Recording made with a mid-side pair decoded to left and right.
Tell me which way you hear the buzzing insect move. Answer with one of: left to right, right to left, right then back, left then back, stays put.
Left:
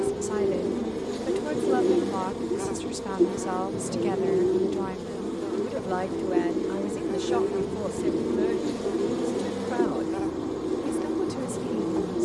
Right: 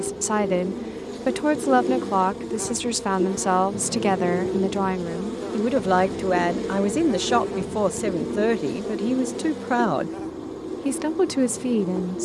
right then back.